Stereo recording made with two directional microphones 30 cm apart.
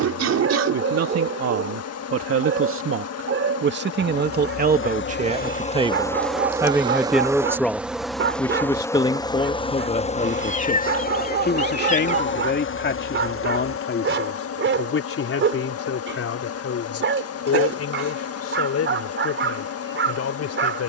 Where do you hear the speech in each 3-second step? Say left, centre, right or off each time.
right, right, centre, left, left, left, left.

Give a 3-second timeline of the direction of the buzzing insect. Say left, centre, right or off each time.
left, left, centre, left, left, left, left.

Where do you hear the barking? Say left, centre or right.
right.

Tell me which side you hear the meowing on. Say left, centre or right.
left.